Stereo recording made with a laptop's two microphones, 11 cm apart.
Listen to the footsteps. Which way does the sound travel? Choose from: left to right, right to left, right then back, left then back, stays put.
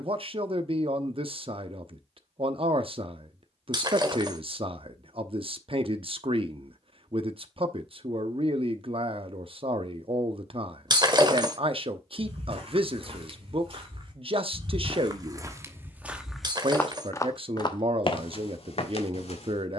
right to left.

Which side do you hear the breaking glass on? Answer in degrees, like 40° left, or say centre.
40° right.